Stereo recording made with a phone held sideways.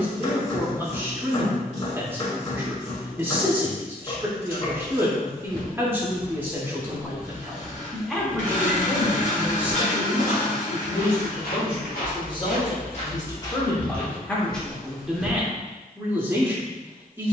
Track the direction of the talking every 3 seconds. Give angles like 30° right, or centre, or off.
10° right, 10° right, centre, 40° left, 20° left, 10° right.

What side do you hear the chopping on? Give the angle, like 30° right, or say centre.
40° left.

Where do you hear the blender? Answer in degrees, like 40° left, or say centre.
50° left.